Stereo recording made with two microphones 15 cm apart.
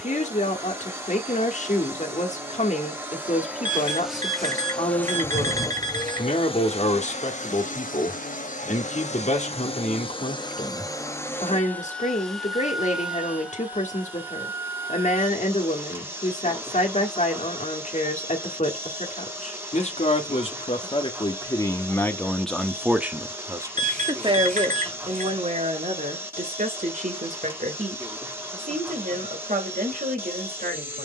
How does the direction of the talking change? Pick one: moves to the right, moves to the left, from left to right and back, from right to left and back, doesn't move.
moves to the right.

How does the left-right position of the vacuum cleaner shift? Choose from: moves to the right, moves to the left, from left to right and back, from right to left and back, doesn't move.
from right to left and back.